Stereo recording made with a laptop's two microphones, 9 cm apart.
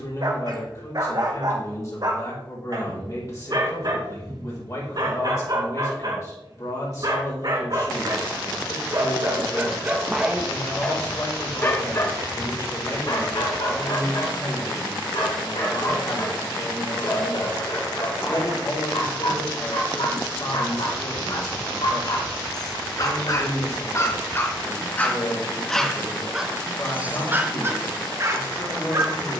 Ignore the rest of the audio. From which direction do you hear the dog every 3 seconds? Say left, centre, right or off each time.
right, right, right, centre, left, left, left, left, centre, right.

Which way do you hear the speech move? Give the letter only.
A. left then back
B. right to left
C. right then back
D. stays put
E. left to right
D.